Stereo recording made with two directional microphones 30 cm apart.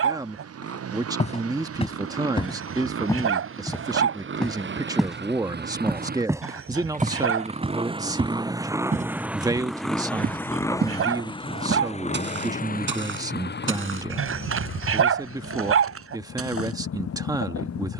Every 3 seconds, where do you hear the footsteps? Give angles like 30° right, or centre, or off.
20° left, centre, 20° right, 30° right, 40° right, 50° right.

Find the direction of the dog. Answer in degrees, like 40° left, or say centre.
50° right.